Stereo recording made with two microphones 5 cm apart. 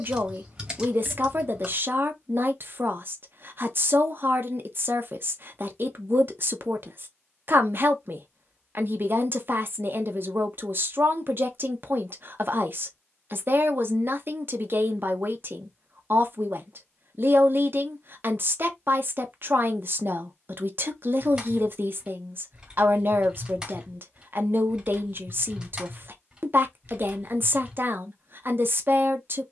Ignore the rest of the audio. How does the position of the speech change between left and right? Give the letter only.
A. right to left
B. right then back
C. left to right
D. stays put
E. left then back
D.